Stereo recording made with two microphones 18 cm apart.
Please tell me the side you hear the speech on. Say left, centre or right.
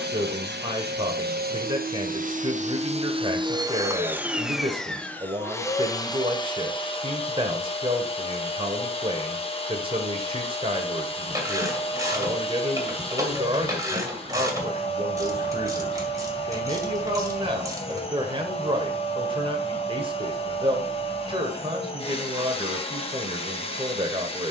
right.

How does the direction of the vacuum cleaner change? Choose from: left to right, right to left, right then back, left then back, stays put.
right to left.